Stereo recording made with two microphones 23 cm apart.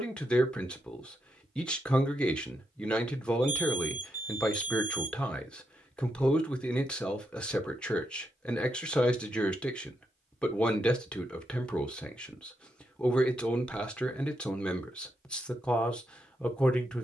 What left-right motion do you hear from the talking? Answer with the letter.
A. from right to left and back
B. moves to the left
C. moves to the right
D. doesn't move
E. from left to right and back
D.